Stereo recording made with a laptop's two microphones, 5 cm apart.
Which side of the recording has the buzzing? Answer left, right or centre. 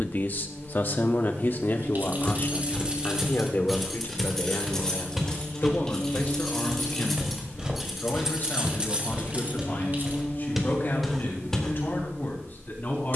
left.